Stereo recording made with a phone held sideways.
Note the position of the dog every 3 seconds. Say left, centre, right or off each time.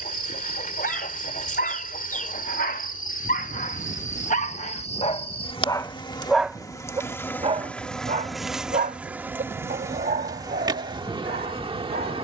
left, left, right, right.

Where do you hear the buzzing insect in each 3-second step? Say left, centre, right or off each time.
left, left, centre, right.